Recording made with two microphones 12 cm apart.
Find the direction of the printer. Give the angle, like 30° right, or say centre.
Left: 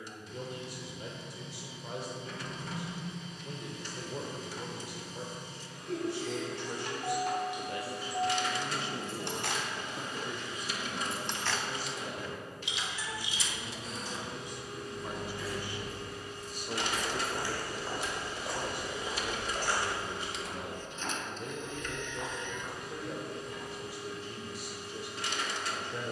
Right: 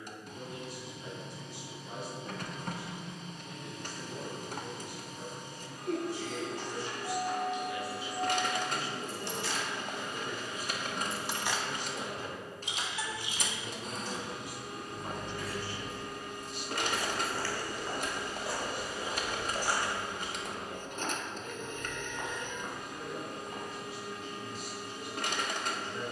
50° right.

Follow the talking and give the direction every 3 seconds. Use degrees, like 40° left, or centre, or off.
80° left, 80° left, 50° left, centre, 20° right, 40° left, 70° left, 80° left, 80° left.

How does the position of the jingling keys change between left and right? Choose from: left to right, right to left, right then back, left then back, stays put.
left to right.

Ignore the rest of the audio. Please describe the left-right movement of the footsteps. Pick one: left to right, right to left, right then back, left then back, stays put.
left to right.